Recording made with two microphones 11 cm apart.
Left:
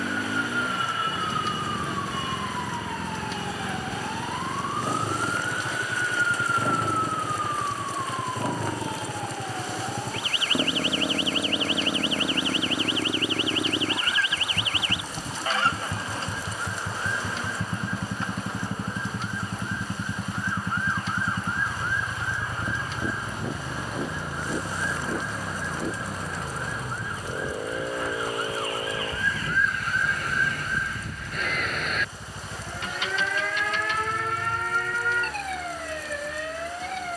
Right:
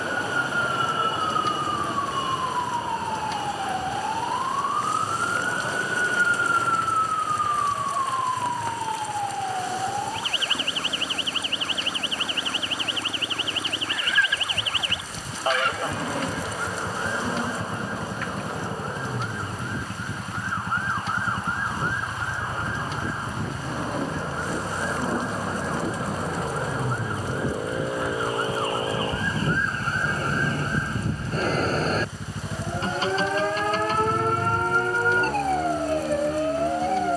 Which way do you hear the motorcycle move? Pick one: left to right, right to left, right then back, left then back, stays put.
left to right.